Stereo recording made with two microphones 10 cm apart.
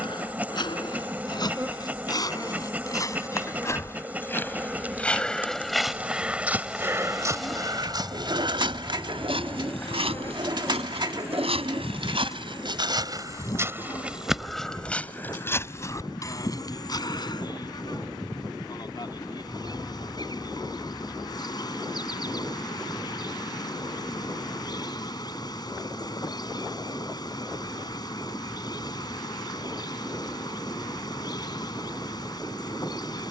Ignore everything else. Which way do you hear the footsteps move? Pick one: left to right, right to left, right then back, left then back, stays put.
right then back.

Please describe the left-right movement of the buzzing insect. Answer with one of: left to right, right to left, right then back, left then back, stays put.
right to left.